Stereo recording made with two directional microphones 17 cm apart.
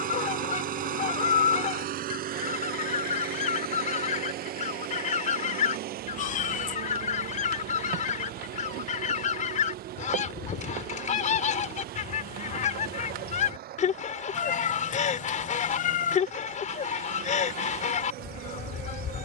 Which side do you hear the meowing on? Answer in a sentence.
In this clip you hear the meowing on the left.